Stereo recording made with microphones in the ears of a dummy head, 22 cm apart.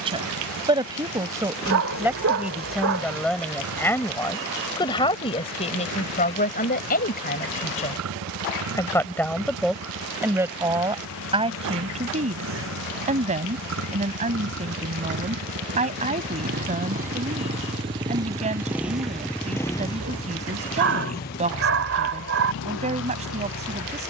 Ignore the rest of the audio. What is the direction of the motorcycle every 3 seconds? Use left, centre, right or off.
right, right, right, right, right, right, centre, left.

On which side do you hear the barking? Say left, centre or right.
right.